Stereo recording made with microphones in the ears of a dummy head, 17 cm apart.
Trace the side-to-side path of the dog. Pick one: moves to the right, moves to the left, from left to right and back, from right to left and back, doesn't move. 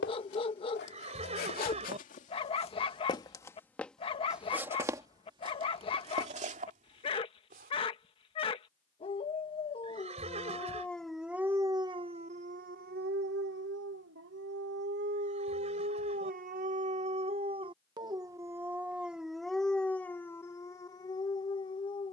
from left to right and back.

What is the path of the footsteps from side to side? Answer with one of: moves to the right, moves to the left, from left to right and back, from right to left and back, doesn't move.
moves to the right.